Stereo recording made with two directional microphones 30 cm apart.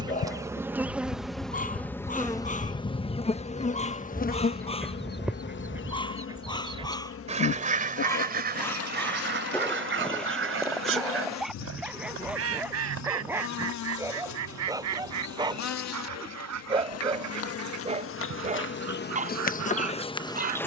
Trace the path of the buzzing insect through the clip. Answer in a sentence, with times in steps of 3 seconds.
In this clip you hear the buzzing insect in the centre from 0 s and on the left from 3 s.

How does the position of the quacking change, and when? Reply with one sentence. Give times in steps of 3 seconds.
You can hear the quacking on the left from 0 s, in the centre from 3 s and on the right from 6 s.